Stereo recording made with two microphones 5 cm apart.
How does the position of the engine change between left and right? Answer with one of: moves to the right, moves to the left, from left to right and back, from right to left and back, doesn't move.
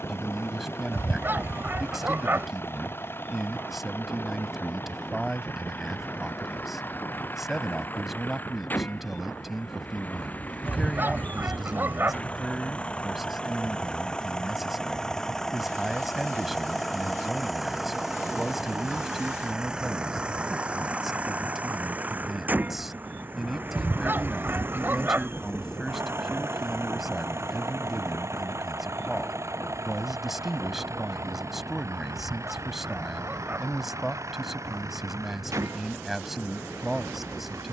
moves to the right.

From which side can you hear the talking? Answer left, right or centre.
centre.